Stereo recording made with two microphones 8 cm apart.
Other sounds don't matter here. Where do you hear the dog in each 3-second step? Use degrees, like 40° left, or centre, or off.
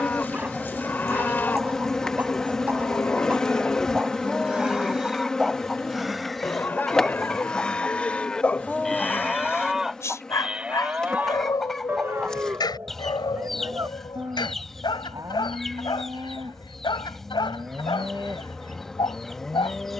20° right, 10° right, 10° left, 40° left, 70° left, 80° left, 80° left.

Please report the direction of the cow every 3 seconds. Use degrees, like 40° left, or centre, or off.
20° left, 20° left, 20° left, 10° right, 40° right, 50° right, centre.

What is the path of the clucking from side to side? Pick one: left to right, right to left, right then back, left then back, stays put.
stays put.